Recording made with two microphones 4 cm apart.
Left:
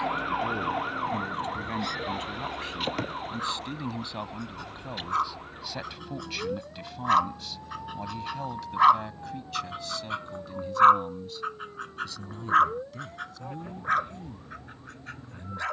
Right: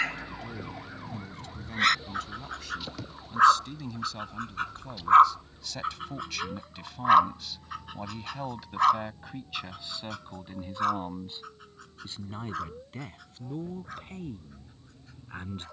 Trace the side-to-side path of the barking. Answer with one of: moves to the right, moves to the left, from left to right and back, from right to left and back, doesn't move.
moves to the left.